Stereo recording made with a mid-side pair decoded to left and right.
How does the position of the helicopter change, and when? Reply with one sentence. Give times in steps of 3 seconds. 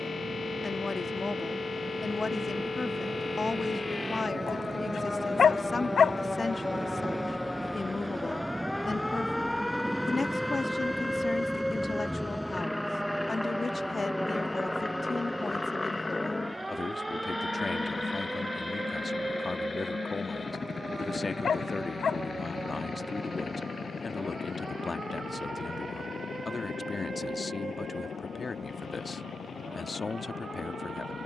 In this clip you hear the helicopter on the right from 0 s, in the centre from 9 s and on the left from 15 s.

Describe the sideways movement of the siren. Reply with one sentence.
In this clip you hear the siren go from the left side to the right.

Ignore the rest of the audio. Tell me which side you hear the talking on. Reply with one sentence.
In this clip you hear the talking on the left.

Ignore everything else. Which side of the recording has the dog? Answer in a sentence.
You can hear the dog on the left.